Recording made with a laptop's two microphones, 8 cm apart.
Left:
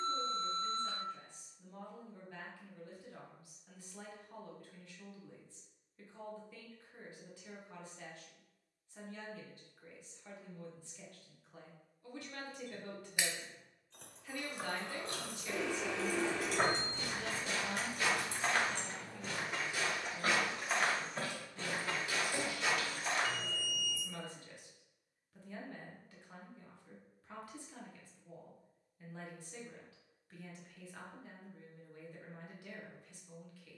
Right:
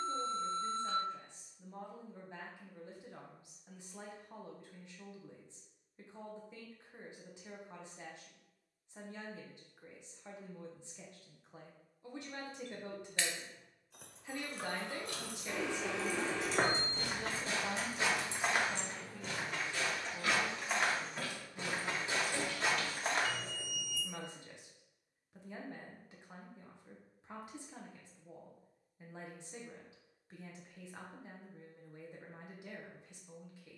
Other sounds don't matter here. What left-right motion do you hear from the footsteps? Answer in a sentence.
In this clip you hear the footsteps go left and come back.